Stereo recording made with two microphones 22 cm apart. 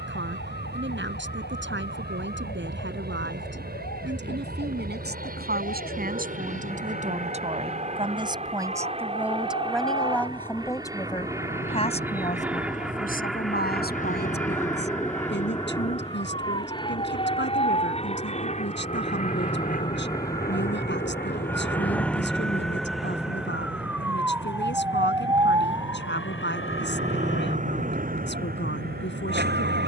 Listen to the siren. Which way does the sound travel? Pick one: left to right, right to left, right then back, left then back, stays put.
left to right.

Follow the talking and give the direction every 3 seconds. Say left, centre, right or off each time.
right, right, right, centre, left, left, left, left, left, left.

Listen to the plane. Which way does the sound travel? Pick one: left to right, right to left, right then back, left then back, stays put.
right to left.